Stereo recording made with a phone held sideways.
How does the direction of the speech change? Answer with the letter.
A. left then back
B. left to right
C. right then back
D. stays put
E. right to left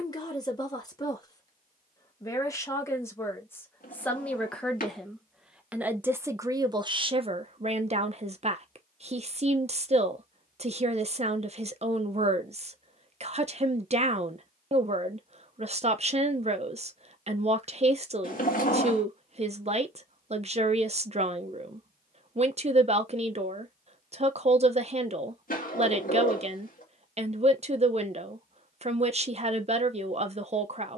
B.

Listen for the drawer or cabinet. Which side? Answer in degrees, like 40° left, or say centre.
60° left.